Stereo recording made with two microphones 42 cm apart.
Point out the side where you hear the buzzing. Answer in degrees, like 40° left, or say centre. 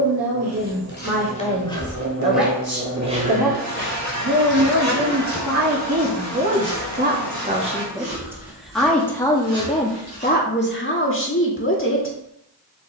40° right.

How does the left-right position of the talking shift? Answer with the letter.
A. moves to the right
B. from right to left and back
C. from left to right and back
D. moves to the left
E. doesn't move
D.